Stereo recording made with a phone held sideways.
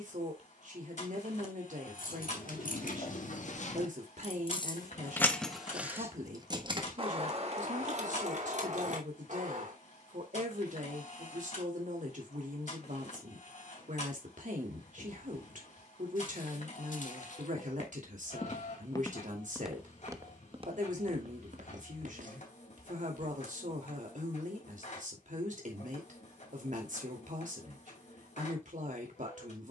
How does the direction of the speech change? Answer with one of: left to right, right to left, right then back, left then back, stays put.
stays put.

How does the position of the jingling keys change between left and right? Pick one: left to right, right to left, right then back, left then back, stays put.
left to right.